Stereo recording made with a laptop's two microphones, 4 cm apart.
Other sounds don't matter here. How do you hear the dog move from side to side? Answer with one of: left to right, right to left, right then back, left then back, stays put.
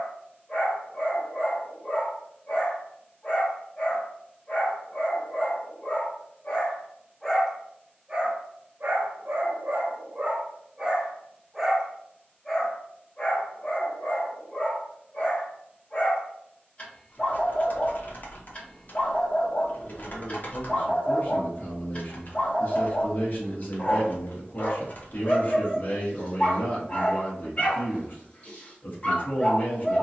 right then back.